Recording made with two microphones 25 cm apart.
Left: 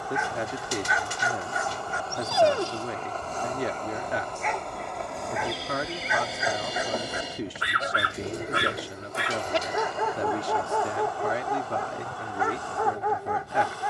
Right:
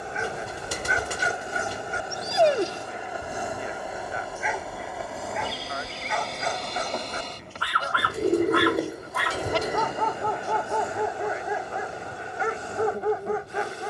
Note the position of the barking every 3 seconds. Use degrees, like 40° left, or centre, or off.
30° right, centre, 20° left, 10° left, 30° right.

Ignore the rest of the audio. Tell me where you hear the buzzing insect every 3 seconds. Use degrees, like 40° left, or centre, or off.
20° right, 10° right, centre, 20° right, 20° right.